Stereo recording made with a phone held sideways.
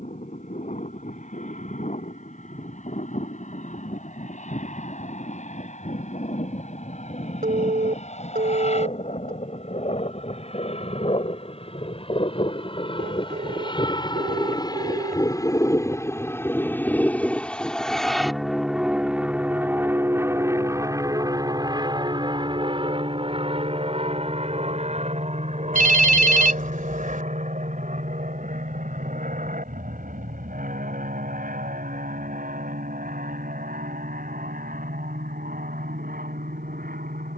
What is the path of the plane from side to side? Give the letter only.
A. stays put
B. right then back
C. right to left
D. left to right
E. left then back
D.